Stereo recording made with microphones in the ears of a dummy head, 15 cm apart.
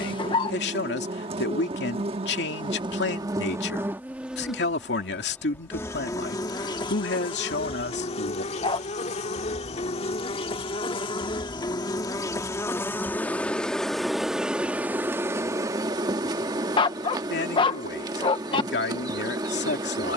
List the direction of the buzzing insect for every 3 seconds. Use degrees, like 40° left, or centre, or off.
40° right, centre, 30° left, 30° left, 10° left, 20° right, 20° right.